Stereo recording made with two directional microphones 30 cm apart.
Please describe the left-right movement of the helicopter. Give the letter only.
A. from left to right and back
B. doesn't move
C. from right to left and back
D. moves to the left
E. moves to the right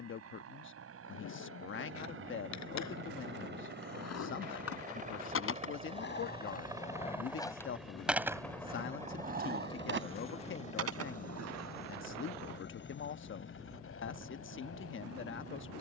D.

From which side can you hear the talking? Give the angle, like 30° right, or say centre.
40° left.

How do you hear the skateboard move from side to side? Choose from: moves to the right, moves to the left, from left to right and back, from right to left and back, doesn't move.
moves to the right.